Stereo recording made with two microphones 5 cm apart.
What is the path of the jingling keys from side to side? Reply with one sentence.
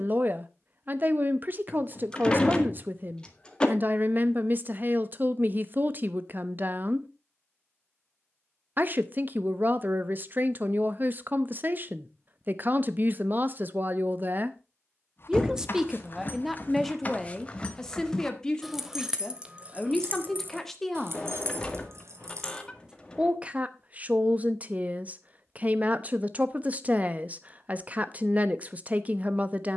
In this clip you hear the jingling keys move from left to right.